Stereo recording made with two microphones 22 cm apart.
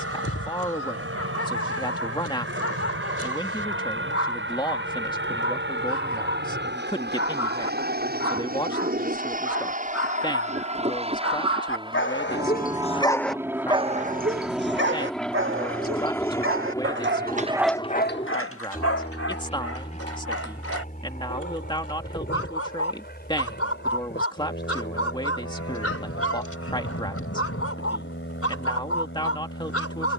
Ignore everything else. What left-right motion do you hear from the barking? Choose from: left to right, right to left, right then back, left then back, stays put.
right then back.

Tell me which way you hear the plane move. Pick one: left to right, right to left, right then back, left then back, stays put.
right to left.